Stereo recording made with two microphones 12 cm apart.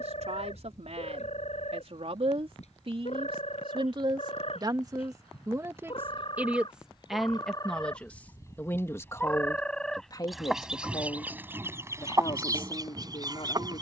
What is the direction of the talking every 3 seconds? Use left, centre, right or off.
right, right, centre, left, left.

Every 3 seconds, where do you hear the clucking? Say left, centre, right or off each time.
left, left, left, centre, right.